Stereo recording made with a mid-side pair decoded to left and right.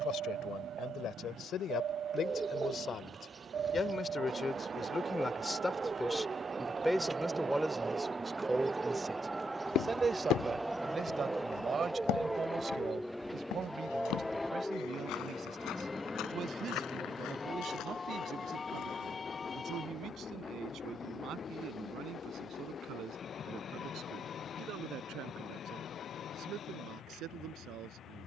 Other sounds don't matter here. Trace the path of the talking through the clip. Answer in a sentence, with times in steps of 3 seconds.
In this clip you hear the talking on the left from 0 s, in the centre from 6 s and on the right from 9 s.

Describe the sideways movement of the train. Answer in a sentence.
You can hear the train move to the left.